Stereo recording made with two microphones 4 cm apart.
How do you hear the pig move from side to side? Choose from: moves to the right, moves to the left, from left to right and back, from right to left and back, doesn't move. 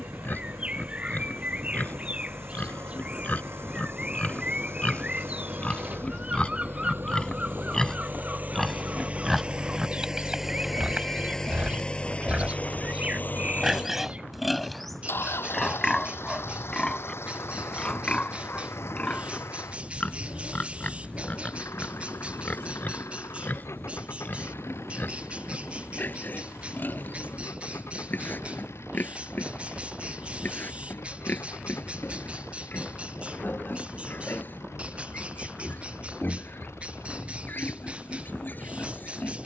from left to right and back.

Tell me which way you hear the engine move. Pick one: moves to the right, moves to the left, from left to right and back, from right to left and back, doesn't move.
moves to the left.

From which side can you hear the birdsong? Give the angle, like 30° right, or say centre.
30° right.